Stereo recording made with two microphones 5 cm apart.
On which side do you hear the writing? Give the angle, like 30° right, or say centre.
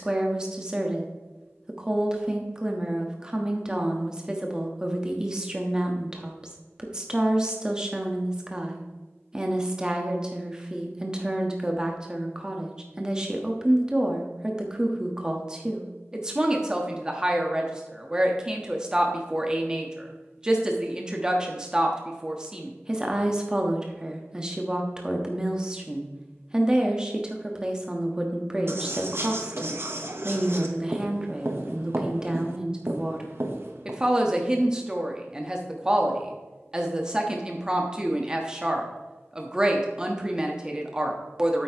60° right.